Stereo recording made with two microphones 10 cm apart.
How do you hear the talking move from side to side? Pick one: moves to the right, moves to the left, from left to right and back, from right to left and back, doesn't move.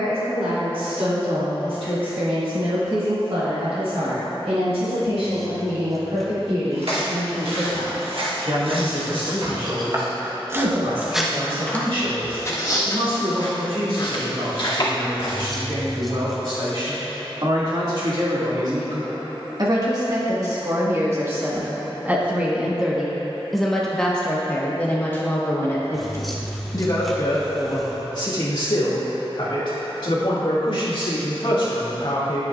moves to the left.